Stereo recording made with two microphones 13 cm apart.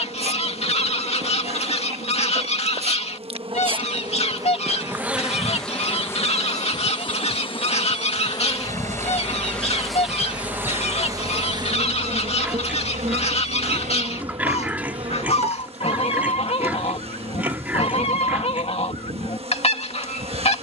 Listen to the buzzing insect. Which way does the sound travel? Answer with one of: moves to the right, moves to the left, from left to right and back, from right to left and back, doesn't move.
from right to left and back.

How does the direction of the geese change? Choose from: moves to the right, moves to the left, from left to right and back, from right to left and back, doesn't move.
doesn't move.